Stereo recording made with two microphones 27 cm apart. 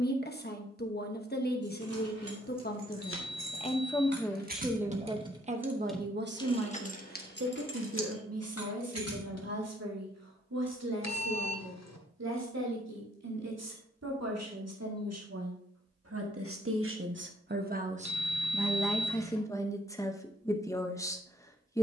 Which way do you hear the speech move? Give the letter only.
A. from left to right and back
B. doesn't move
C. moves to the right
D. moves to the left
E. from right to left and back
A.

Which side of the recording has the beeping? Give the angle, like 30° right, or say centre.
70° left.